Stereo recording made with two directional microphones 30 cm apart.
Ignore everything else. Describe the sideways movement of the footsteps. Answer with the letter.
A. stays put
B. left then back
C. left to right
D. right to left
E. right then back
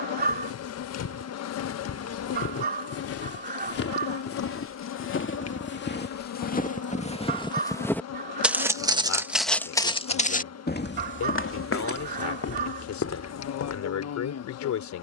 E.